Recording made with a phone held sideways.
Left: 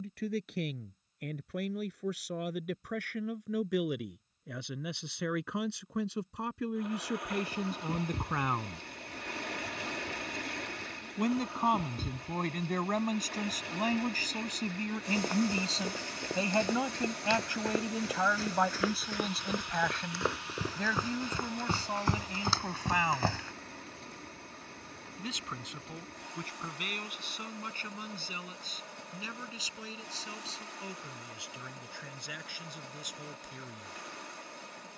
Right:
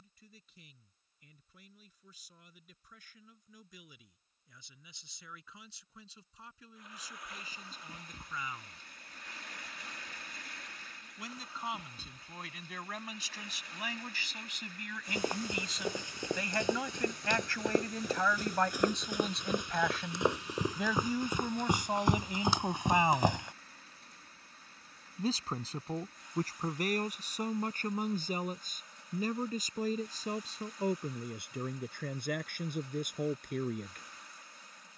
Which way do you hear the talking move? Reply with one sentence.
You can hear the talking move to the right.